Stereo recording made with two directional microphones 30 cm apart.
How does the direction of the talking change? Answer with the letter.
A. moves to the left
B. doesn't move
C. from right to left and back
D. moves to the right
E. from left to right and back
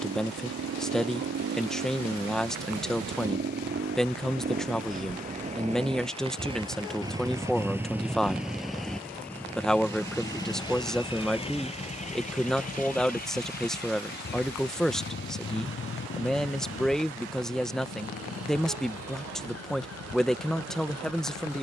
B.